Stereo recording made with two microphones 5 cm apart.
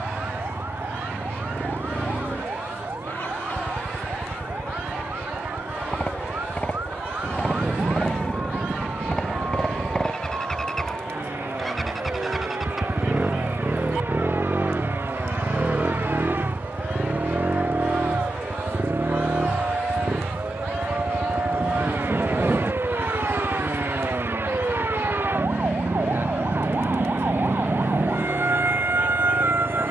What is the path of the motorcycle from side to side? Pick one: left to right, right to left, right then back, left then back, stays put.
left to right.